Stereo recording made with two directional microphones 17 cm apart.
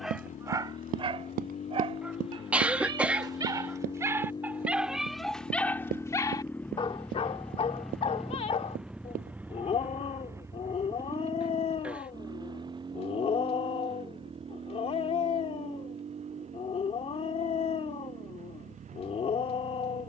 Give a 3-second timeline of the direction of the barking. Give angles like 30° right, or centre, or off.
30° right, 10° right, 30° left, 40° left, 40° left, 40° left, 40° left.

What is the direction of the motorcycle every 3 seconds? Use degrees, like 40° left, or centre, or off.
40° left, 30° left, centre, 20° right, 30° right, 40° right, 50° right.